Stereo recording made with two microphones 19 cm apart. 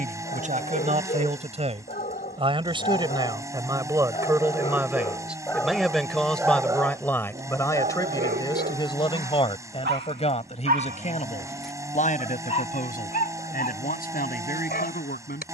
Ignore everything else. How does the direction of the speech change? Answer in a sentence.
In this clip you hear the speech travel towards the left.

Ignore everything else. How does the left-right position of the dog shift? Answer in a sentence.
You can hear the dog move from left to right and back again.